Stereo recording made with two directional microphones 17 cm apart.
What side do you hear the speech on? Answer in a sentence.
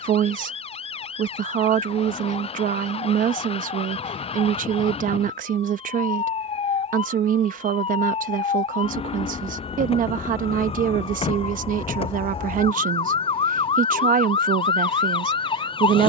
In this clip you hear the speech on the right.